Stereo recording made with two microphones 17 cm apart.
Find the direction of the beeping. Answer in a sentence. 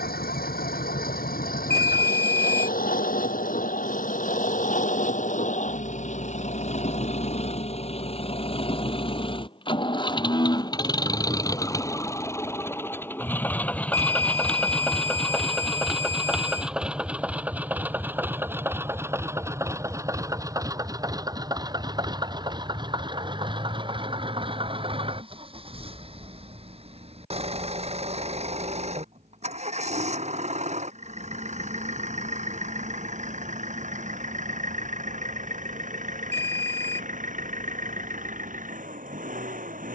You can hear the beeping on the right.